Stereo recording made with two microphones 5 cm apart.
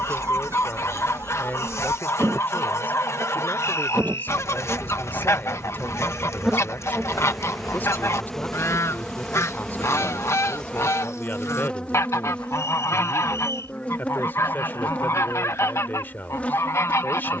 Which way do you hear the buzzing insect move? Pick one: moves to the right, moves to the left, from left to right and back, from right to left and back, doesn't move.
moves to the left.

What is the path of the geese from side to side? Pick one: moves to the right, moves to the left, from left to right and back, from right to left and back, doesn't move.
doesn't move.